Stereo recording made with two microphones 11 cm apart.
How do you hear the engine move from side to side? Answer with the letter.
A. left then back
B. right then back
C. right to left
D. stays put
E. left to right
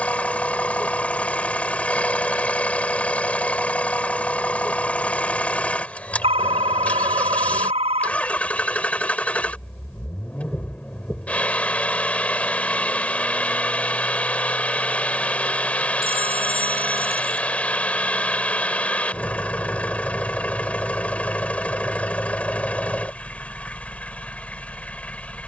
D.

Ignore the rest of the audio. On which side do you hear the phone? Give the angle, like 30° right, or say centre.
70° right.